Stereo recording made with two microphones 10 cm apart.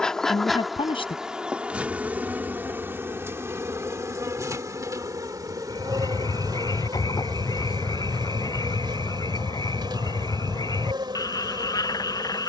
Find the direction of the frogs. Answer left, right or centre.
left.